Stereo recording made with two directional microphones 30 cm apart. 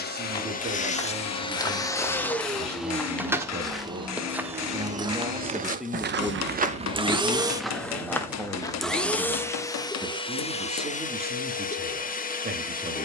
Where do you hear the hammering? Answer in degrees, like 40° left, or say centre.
60° left.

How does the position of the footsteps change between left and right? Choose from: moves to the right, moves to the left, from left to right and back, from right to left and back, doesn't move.
from left to right and back.